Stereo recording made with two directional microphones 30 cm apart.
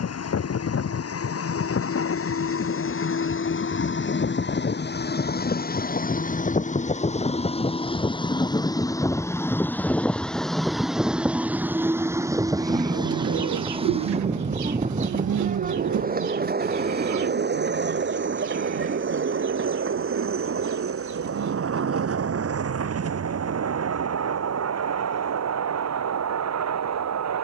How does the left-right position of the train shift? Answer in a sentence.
In this clip you hear the train go from the left side to the right.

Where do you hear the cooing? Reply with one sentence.
You can hear the cooing on the right.